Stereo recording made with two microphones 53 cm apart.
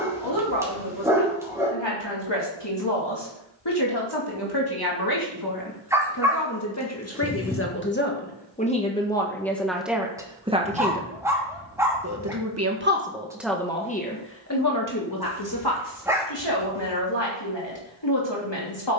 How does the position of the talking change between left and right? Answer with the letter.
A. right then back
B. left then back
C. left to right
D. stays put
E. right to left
A.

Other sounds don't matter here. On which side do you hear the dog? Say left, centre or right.
centre.